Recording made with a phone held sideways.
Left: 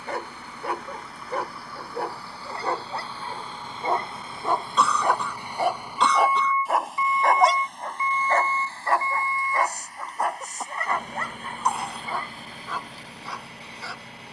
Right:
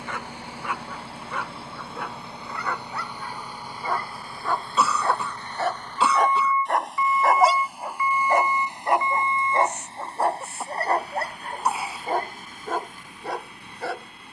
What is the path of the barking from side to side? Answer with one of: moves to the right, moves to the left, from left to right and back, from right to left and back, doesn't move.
moves to the right.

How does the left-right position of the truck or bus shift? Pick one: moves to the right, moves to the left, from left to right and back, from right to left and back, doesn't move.
moves to the left.